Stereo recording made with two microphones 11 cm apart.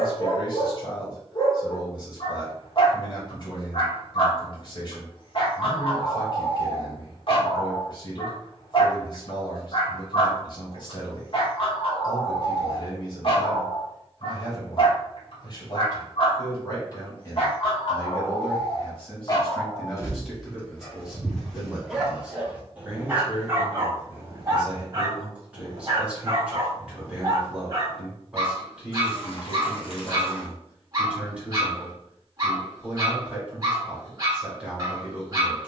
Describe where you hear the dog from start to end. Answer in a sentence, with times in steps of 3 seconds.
You can hear the dog on the left from 0 s, in the centre from 21 s and on the right from 24 s.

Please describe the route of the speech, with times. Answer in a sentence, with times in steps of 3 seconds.
In this clip you hear the speech on the left from 0 s and in the centre from 18 s.